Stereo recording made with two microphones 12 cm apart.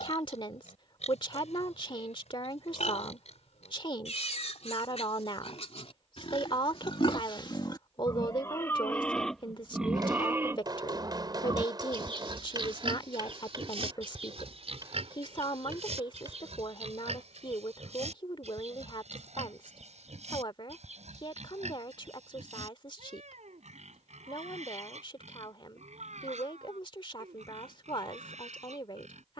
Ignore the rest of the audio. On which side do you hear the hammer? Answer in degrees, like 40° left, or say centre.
40° right.